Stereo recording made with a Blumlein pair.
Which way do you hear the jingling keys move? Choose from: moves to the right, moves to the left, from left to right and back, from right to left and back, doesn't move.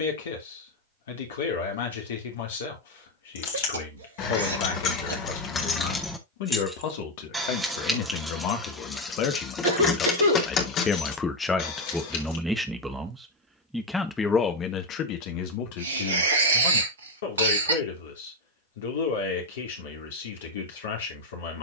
from left to right and back.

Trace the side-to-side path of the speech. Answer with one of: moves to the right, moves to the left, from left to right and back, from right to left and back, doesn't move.
from left to right and back.